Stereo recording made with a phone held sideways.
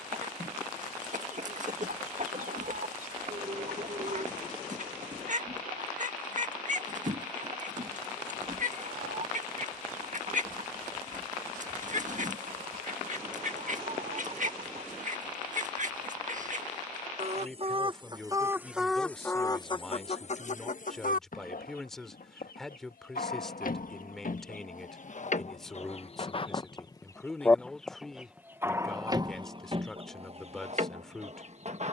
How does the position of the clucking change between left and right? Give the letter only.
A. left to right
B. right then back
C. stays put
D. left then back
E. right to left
D.